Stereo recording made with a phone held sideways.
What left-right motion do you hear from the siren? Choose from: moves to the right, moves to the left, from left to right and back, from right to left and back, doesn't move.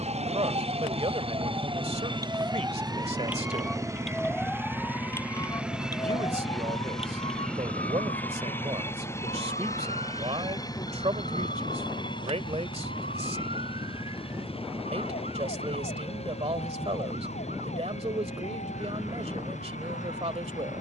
moves to the left.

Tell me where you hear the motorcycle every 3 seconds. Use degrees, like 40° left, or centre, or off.
40° right, 20° right, 10° left, 20° left, 30° left, 40° left, 50° left.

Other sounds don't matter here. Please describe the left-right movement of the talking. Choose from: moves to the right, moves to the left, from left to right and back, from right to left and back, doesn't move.
doesn't move.